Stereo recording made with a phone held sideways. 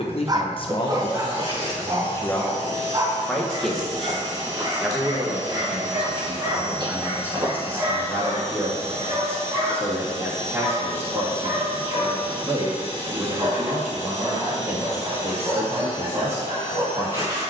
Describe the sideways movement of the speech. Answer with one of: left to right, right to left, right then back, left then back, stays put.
left to right.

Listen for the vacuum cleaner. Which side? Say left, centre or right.
right.